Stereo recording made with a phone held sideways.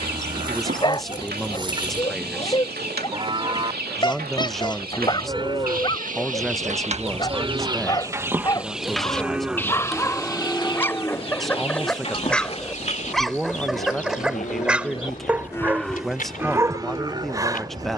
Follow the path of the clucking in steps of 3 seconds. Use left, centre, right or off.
right, right, right, left, left, left.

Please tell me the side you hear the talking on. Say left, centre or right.
centre.